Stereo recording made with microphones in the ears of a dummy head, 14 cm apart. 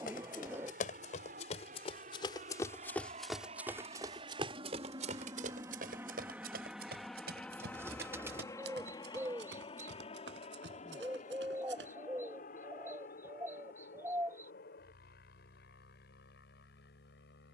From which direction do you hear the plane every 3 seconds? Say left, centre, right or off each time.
right, right, centre, left, left, left.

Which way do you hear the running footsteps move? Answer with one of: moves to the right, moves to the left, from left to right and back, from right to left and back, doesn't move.
moves to the right.